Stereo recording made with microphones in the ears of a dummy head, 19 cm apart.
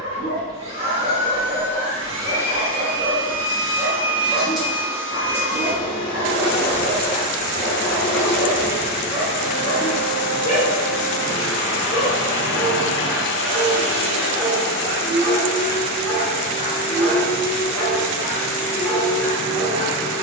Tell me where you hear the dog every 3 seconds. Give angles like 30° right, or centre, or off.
40° right, 30° right, centre, 20° left, centre, 40° right, 40° right.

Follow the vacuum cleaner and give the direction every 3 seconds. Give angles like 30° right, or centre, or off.
30° right, centre, 40° left, 50° left, 50° left, 50° left, 50° left.